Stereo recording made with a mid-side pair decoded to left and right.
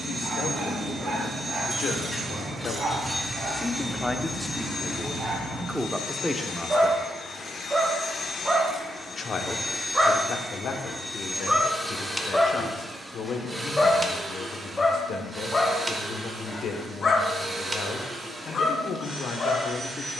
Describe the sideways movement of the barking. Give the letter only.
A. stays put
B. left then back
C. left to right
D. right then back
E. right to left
E.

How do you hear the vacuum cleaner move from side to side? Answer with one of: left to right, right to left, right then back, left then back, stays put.
left then back.